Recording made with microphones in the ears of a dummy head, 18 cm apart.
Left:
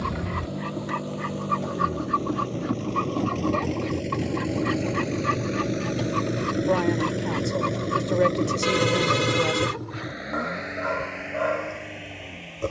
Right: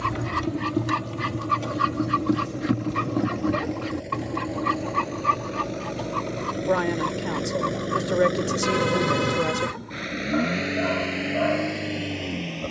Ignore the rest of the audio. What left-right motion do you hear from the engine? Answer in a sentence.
In this clip you hear the engine move to the right.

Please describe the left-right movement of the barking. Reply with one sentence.
You can hear the barking travel towards the left.